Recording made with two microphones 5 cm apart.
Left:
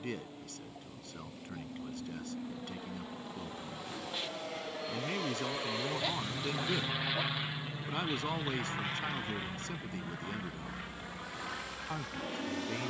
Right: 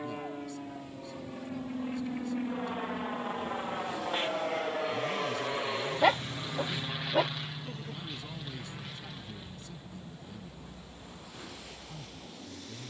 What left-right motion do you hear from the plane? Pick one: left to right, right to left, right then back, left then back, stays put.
right to left.